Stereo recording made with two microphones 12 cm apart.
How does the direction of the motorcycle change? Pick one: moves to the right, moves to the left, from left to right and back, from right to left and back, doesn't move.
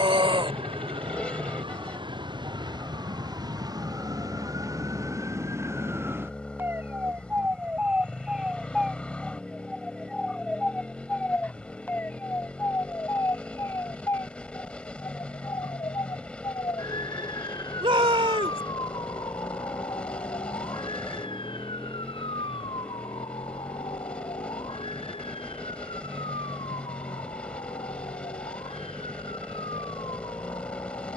doesn't move.